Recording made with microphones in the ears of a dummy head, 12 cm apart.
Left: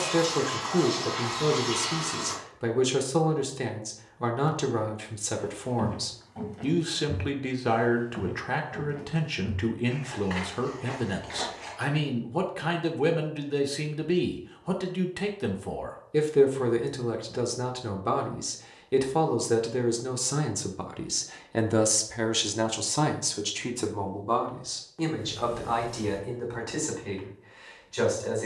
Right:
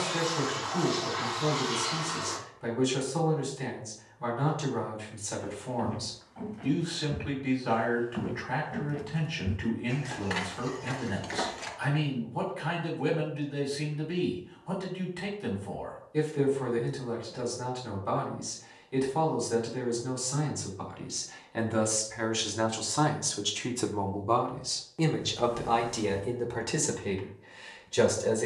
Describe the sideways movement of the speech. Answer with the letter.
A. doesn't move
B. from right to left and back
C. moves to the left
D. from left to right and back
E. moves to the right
E.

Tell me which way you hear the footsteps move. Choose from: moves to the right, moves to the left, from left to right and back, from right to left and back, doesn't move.
moves to the right.